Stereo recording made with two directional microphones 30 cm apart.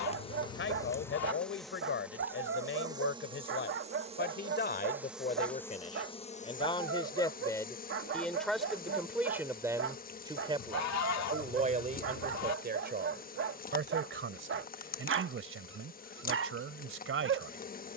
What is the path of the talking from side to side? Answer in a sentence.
You can hear the talking go from the left side to the right.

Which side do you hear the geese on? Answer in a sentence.
In this clip you hear the geese on the left.